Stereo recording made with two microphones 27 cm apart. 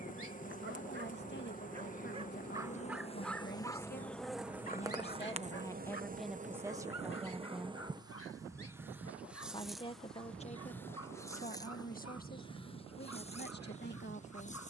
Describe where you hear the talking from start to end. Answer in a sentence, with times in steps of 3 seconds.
You can hear the talking on the left from 0 s, in the centre from 6 s and on the left from 9 s.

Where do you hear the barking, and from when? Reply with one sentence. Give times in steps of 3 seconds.
In this clip you hear the barking on the right from 0 s and on the left from 3 s.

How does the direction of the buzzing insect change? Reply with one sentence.
You can hear the buzzing insect go right and come back.